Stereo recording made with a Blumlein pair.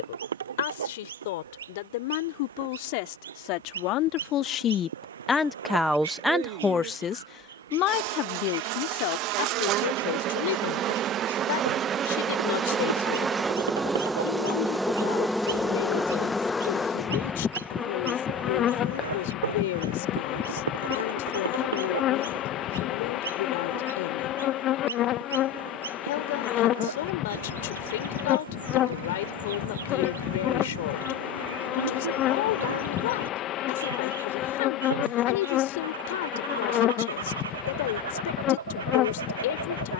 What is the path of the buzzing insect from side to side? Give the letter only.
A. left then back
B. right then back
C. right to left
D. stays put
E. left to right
C.